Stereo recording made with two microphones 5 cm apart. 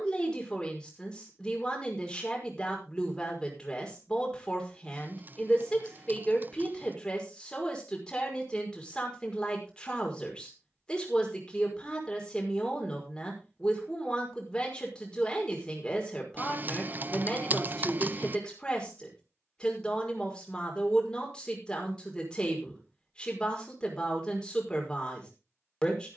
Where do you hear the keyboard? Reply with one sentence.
In this clip you hear the keyboard on the right.